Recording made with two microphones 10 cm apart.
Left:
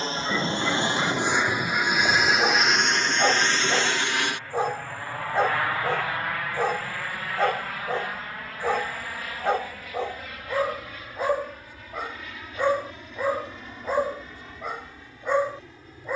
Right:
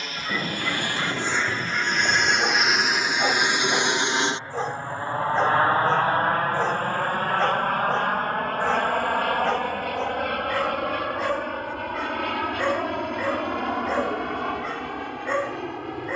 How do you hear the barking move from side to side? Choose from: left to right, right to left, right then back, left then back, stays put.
stays put.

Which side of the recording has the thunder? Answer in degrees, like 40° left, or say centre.
10° left.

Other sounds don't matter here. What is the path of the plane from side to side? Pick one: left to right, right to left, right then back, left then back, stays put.
left to right.